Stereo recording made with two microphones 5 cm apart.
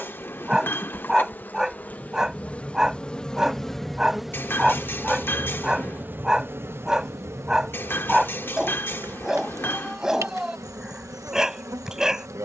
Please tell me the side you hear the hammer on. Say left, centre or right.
left.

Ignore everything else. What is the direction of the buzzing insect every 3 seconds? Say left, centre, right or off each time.
left, centre, right, right.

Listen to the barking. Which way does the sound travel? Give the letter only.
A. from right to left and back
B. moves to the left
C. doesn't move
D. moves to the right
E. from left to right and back
C.